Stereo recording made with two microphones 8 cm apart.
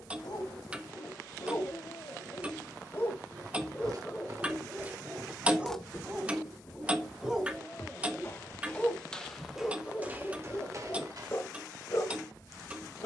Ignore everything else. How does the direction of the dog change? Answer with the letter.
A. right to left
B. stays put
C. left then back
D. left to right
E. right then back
E.